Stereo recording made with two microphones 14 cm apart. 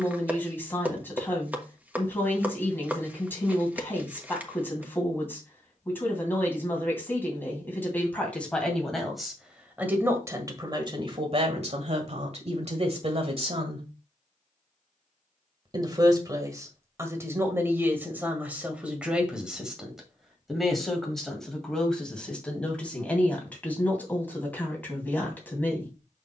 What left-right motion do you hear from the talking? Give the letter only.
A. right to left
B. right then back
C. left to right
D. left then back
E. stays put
B.